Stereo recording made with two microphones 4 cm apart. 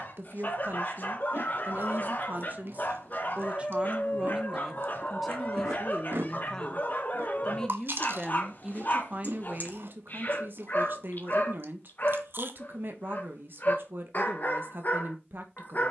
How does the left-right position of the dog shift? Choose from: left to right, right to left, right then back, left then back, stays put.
stays put.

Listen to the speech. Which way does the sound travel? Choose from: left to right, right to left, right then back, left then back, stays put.
left then back.